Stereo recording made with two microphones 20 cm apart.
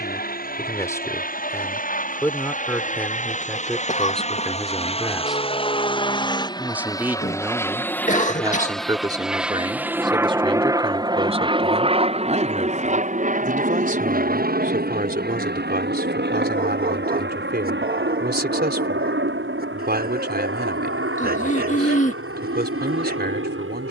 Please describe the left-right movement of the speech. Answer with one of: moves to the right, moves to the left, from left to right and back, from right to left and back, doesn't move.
moves to the right.